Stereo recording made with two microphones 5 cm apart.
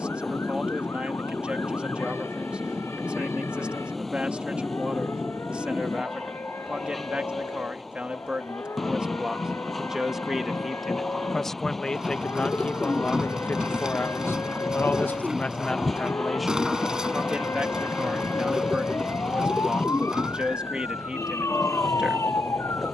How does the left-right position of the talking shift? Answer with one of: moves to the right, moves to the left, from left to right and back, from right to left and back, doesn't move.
from right to left and back.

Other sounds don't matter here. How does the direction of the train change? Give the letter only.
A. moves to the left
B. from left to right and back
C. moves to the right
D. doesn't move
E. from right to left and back
D.